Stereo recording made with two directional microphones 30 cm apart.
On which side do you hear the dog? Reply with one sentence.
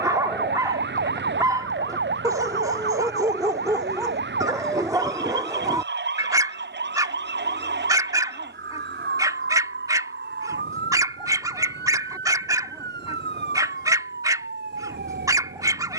In this clip you hear the dog in the centre.